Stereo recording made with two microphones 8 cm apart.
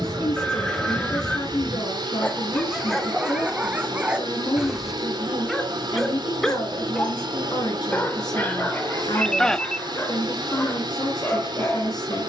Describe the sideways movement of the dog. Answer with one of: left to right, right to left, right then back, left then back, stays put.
right then back.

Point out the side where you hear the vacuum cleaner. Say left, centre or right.
right.